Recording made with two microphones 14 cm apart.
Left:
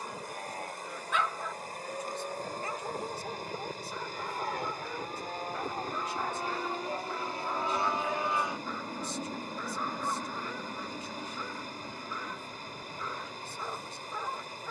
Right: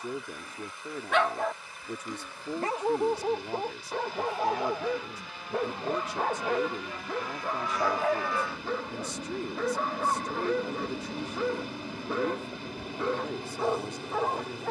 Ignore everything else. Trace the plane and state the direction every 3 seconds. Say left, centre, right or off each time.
left, left, left, centre, right.